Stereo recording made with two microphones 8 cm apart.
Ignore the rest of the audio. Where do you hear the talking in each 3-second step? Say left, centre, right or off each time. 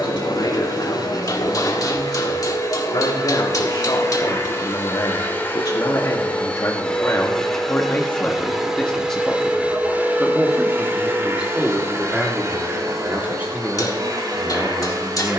left, left, left, centre, right.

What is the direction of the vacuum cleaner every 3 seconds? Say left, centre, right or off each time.
left, left, centre, right, right.